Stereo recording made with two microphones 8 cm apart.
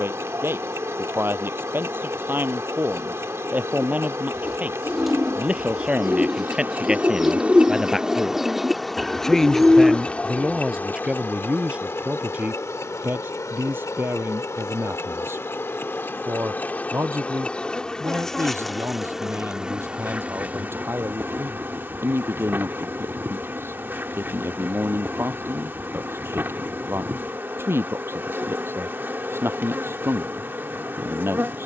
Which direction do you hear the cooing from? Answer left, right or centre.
centre.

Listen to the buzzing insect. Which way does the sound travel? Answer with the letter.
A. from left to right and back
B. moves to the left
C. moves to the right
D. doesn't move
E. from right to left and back
E.